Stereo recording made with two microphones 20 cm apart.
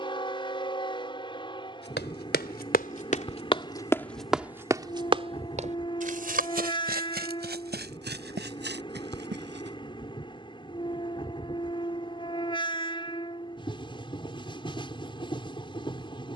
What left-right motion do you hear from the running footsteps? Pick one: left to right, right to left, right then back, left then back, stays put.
left to right.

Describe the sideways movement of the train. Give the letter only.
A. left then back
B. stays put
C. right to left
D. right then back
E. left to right
B.